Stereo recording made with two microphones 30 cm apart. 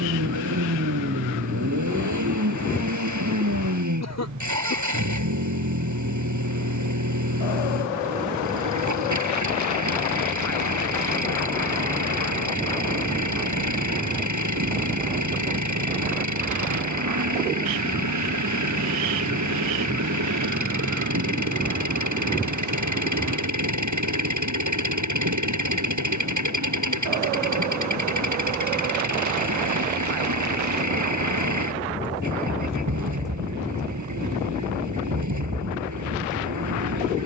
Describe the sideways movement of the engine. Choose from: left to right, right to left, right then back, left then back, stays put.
stays put.